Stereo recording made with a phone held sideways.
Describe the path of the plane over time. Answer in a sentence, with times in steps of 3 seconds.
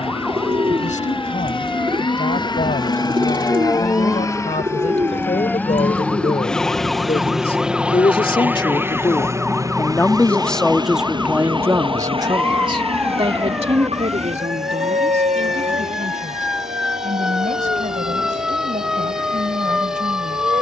You can hear the plane on the left from 0 s, in the centre from 6 s and on the right from 9 s.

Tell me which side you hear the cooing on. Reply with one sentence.
You can hear the cooing on the right.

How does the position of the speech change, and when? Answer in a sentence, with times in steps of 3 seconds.
In this clip you hear the speech on the left from 0 s, in the centre from 9 s and on the right from 12 s.